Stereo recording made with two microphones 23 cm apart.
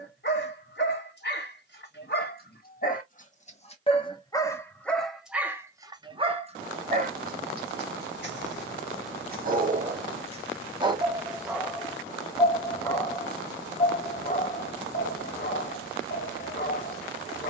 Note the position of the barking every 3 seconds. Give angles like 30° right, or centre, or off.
50° left, 10° left, 40° right, 20° right, 20° left, 40° left.